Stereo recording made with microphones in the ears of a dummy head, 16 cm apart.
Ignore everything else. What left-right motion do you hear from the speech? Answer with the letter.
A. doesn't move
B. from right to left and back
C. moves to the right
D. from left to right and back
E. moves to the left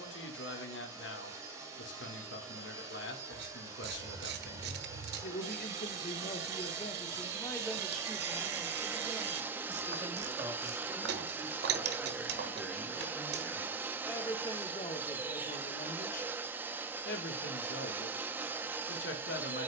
D.